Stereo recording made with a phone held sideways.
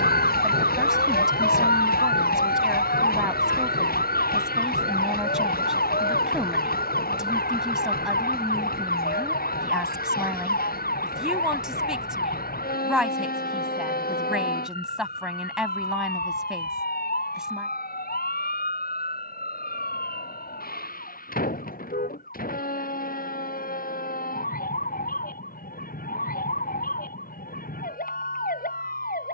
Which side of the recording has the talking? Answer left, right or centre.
centre.